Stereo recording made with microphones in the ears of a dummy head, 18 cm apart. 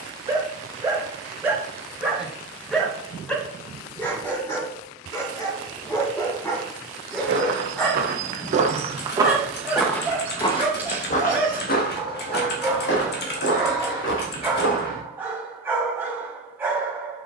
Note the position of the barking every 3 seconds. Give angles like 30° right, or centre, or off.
10° right, 10° left, 10° left, 10° right, 10° right, 10° right.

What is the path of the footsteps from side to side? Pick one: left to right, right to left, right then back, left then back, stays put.
right to left.